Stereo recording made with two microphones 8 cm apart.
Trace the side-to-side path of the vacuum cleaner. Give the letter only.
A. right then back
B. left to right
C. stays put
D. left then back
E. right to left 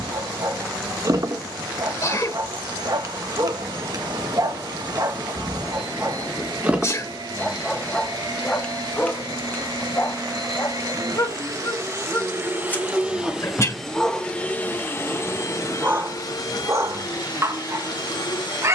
E.